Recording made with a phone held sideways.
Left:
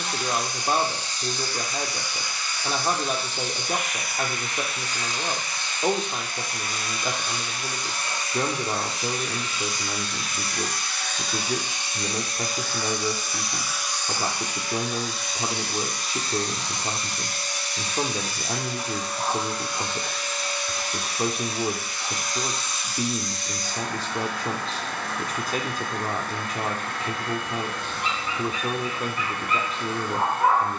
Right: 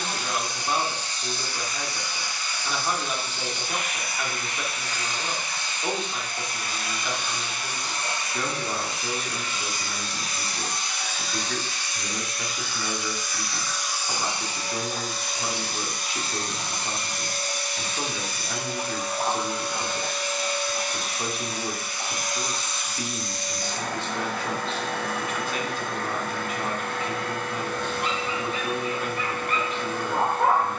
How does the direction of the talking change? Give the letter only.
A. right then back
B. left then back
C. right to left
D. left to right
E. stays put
E.